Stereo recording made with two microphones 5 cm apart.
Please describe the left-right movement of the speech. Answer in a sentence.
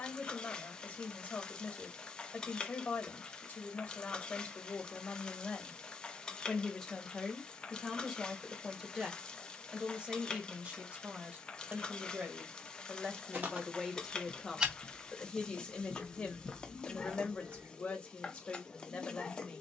In this clip you hear the speech go right and come back.